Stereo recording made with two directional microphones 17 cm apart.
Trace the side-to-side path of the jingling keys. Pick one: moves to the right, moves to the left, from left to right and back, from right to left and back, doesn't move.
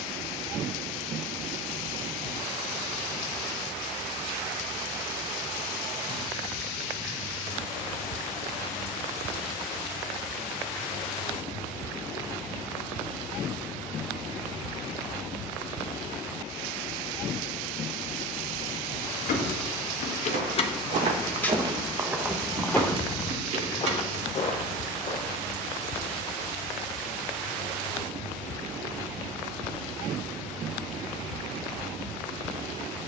moves to the right.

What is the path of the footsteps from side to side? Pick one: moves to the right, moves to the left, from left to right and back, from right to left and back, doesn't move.
moves to the left.